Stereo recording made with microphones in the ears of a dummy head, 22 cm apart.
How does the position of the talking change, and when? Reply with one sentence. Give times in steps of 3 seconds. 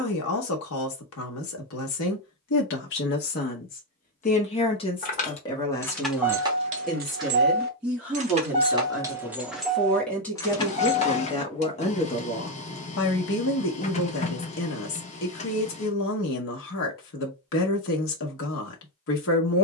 You can hear the talking on the left from 0 s, in the centre from 6 s and on the left from 12 s.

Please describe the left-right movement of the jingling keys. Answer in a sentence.
In this clip you hear the jingling keys move from left to right and back again.